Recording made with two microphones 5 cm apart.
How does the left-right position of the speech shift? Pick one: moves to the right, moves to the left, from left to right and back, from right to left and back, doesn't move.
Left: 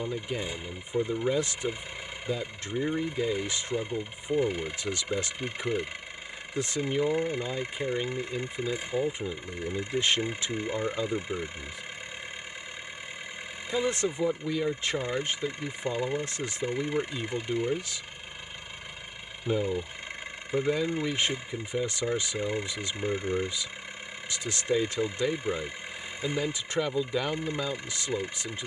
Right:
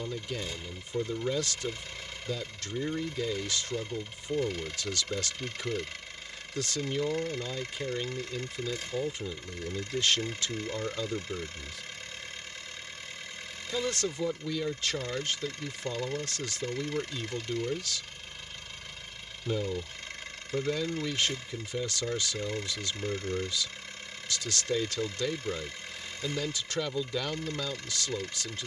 doesn't move.